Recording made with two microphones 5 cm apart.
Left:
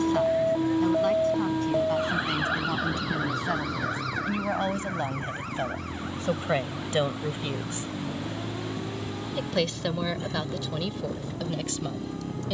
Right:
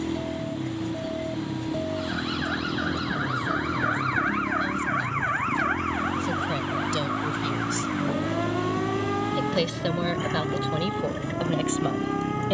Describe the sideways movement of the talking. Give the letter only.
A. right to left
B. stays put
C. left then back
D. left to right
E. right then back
D.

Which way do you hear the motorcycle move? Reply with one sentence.
In this clip you hear the motorcycle stay put.